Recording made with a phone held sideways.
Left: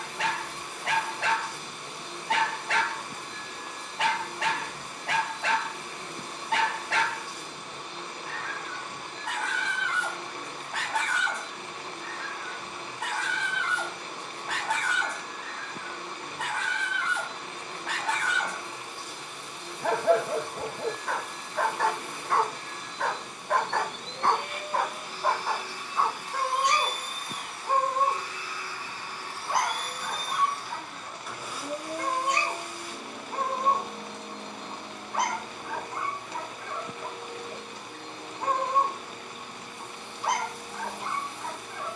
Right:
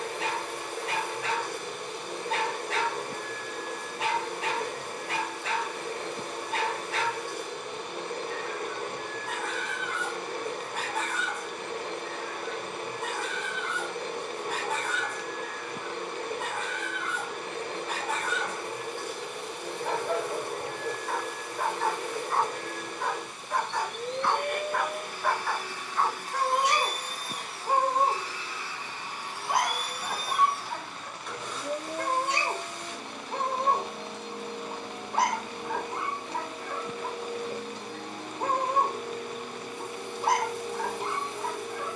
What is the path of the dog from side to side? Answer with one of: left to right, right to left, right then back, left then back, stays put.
left to right.